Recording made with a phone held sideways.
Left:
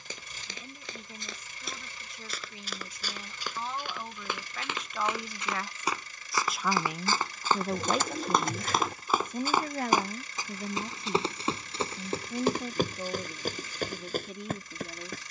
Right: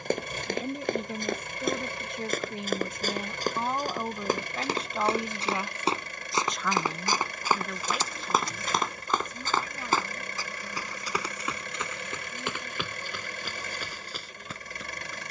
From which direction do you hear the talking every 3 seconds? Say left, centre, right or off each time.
right, right, left, left, left.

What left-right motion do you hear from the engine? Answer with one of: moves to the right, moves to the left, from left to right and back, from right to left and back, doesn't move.
doesn't move.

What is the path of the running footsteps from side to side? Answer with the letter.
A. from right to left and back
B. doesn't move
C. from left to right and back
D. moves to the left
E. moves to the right
D.